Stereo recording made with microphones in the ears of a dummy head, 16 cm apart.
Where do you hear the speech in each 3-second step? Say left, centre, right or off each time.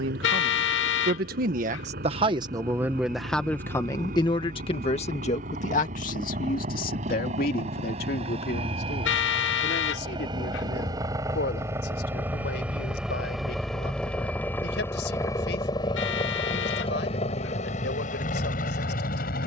right, left, left, left, left, left, left.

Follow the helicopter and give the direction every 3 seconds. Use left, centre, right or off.
right, right, right, right, centre, left, left.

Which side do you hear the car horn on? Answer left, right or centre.
left.